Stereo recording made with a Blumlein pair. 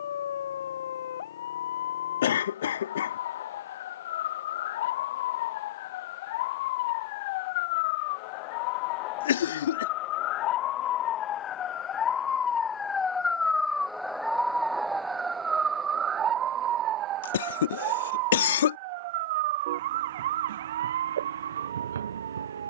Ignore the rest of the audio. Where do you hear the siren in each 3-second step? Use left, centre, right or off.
left, left, left, left, centre, right, right, right.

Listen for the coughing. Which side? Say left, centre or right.
left.